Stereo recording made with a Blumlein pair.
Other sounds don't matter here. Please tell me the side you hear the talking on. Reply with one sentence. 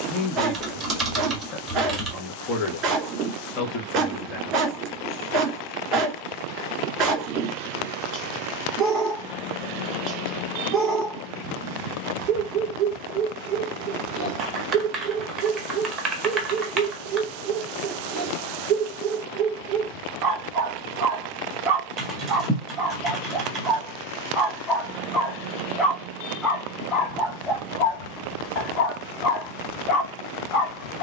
You can hear the talking on the left.